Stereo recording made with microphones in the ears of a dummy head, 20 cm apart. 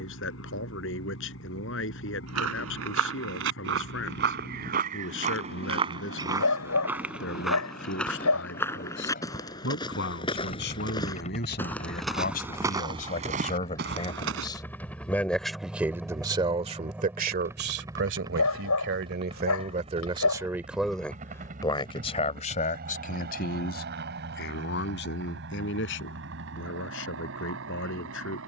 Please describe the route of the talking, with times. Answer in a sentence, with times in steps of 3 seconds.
You can hear the talking on the left from 0 s, on the right from 15 s and on the left from 21 s.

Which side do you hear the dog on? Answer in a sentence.
You can hear the dog on the left.